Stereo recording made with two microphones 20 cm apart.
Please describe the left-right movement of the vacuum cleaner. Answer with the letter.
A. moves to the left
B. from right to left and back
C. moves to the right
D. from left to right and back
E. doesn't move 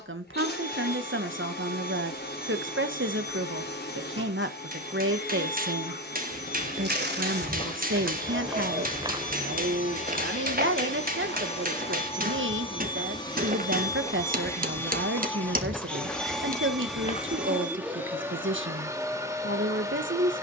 C.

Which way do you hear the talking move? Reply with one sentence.
In this clip you hear the talking stay put.